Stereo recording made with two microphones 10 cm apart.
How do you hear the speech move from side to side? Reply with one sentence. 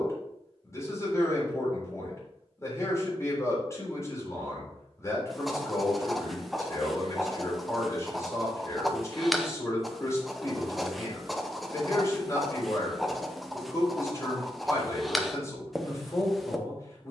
You can hear the speech stay in one place.